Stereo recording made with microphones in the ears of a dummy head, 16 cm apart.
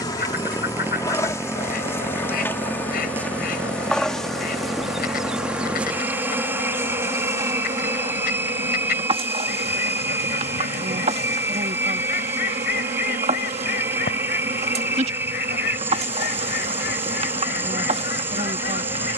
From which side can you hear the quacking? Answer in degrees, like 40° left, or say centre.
50° left.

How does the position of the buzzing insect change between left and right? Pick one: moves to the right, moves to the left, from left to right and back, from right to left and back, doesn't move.
moves to the right.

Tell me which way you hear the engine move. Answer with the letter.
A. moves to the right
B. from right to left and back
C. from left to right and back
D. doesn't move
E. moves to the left
D.